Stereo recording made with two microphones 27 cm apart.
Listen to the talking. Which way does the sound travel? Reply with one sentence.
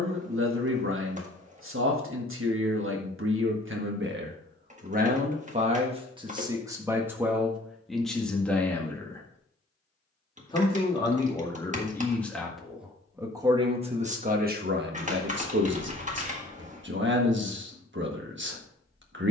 You can hear the talking go left and come back.